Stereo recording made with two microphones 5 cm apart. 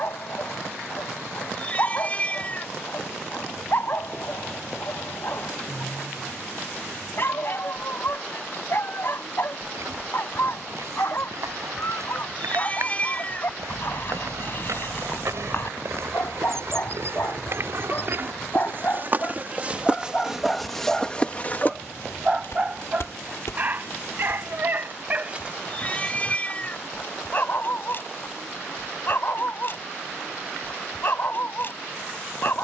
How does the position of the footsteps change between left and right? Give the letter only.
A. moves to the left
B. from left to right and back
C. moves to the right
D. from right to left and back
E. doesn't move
A.